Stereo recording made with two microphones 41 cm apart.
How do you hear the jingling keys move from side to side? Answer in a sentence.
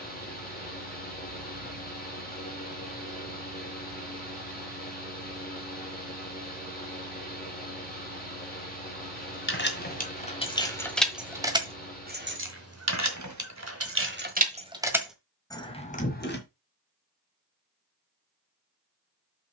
In this clip you hear the jingling keys go right and come back.